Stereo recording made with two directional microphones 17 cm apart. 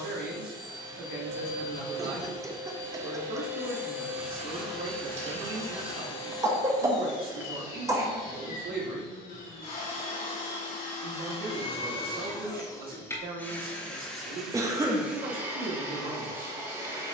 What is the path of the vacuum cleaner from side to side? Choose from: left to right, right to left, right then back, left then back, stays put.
left then back.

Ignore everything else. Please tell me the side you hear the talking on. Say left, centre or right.
right.